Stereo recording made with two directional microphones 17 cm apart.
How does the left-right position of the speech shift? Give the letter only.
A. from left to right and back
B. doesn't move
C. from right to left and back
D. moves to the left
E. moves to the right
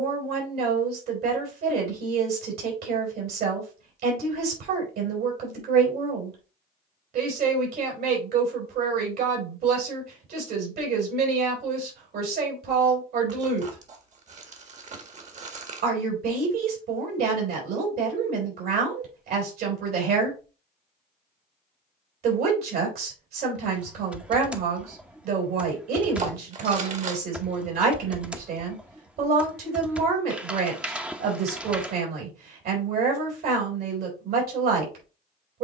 B.